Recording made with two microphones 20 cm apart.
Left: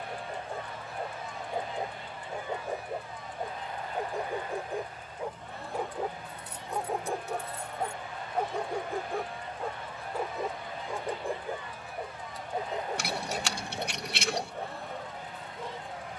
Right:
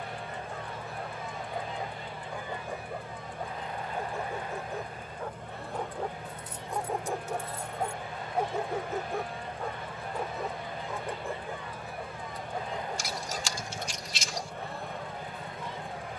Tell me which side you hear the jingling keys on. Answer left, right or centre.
left.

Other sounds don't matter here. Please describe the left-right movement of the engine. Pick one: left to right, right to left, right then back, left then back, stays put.
stays put.